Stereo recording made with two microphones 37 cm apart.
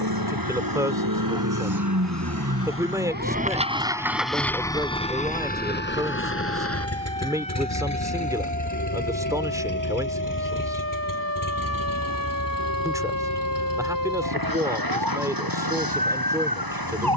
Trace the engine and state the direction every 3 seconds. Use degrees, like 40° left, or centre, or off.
60° right, centre, 40° left, 60° left, 60° left, 70° left.